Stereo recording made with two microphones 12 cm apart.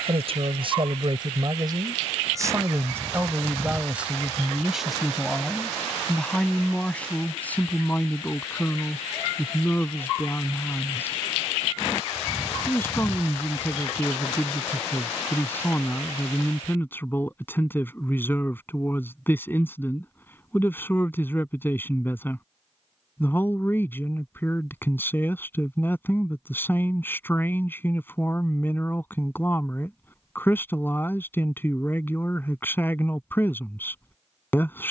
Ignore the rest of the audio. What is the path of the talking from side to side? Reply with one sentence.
You can hear the talking move to the left.